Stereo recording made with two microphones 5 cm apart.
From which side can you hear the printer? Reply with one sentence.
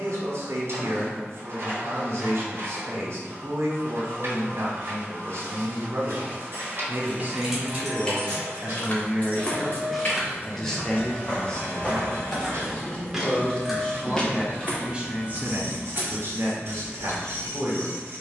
You can hear the printer on the right.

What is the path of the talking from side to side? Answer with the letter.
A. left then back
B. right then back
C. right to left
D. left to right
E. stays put
A.